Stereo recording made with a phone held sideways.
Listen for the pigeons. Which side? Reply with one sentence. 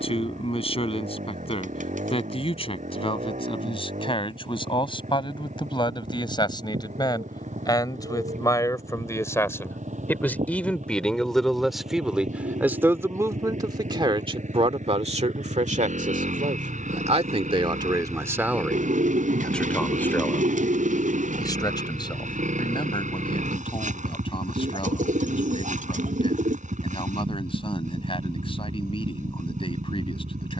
You can hear the pigeons on the right.